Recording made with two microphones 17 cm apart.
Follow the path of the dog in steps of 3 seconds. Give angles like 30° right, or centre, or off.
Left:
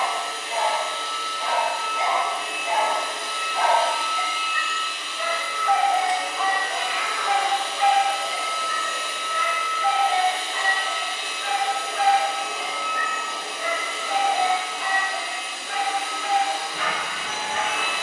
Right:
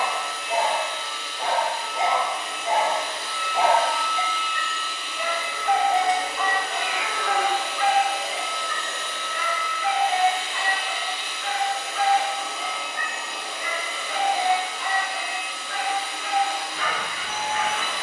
40° right, 10° right, 20° left, 40° left, 60° left, 60° left.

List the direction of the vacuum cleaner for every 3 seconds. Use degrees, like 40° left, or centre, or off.
70° left, 10° left, 10° right, 40° left, 70° left, 70° left.